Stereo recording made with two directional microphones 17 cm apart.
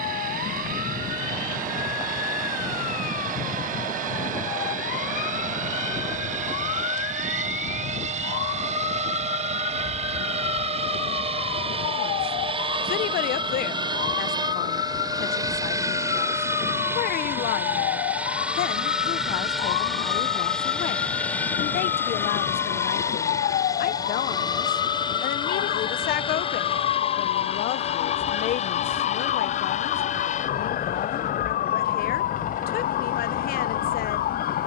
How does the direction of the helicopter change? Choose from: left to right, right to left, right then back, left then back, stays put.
right to left.